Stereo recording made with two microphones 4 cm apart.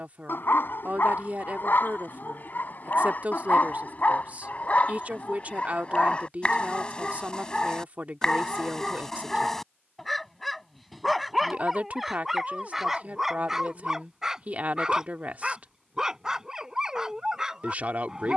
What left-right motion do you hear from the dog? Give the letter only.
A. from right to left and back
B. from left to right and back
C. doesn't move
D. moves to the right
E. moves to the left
D.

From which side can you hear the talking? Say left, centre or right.
right.